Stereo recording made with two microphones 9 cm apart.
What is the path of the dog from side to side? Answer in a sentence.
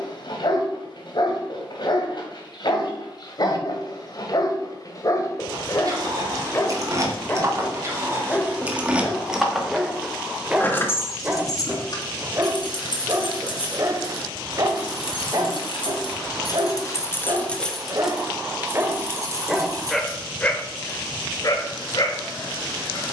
You can hear the dog move from left to right and back again.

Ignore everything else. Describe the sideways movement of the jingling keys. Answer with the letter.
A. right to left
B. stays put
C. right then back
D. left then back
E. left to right
D.